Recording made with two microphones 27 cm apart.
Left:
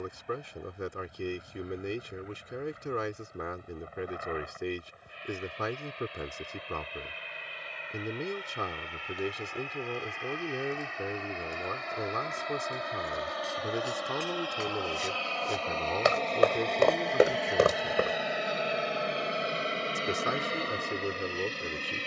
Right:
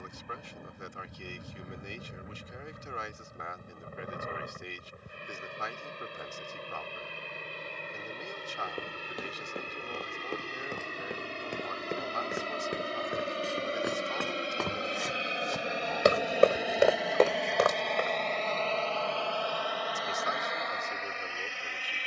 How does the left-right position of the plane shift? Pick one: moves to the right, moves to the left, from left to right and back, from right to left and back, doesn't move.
moves to the left.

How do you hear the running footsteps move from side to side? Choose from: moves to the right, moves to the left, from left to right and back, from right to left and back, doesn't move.
moves to the left.